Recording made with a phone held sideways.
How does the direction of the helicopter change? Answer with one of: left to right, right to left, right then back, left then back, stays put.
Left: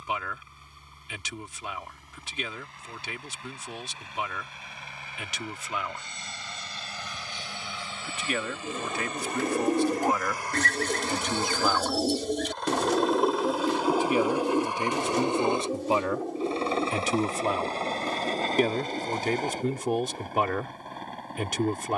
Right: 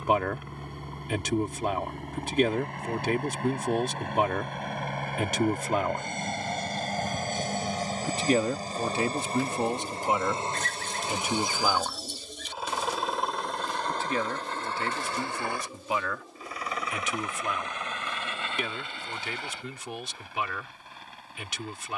right to left.